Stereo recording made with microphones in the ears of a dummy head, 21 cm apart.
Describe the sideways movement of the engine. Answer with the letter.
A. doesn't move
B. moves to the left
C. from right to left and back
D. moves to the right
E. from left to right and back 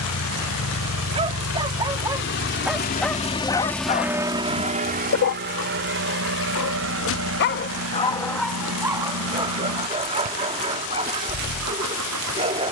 D.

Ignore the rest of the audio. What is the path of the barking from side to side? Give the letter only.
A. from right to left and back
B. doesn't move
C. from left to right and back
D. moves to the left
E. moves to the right
A.